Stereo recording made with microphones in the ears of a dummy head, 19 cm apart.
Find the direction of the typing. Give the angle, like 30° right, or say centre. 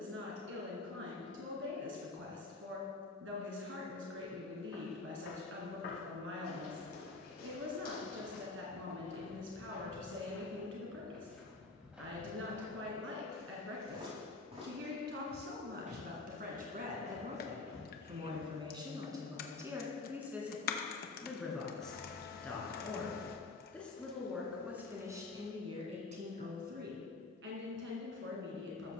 50° left.